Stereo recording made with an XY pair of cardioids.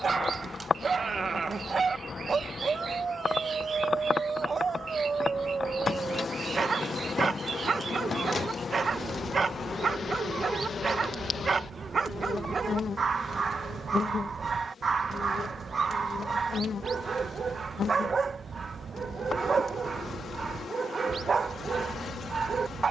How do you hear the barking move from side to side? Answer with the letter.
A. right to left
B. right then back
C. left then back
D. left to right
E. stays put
E.